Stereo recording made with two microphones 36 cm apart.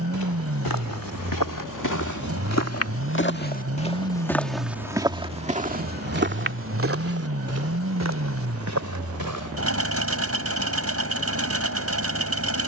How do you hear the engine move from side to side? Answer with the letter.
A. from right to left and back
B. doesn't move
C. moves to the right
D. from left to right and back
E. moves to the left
B.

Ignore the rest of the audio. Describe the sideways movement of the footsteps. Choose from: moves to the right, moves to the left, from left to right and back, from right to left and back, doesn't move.
moves to the right.